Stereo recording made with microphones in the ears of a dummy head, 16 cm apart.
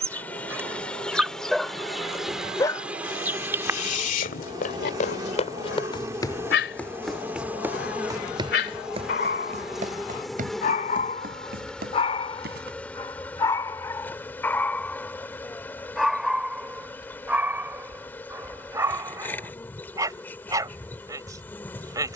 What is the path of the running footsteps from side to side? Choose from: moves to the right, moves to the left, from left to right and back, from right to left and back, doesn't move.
moves to the right.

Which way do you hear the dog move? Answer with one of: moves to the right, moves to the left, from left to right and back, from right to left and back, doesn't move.
from right to left and back.